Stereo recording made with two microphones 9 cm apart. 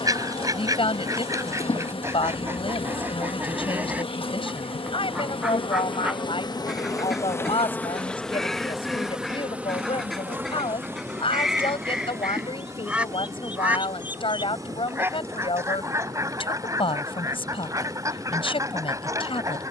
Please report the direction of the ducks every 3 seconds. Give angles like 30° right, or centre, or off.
30° right, 10° right, centre, centre, 10° right, 30° right, 40° right.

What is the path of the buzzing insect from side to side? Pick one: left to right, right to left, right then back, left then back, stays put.
left to right.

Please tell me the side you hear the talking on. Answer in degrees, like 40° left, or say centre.
70° left.